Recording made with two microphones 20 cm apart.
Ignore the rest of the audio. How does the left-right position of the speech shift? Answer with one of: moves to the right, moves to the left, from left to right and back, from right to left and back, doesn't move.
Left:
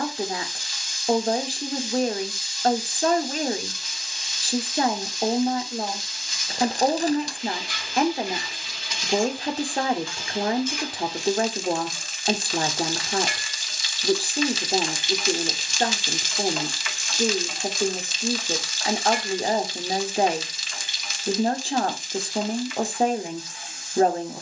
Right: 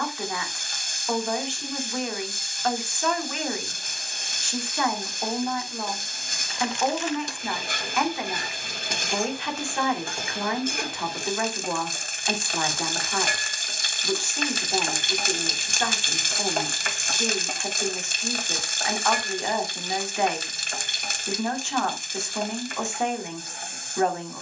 doesn't move.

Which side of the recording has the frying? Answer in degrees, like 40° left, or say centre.
50° right.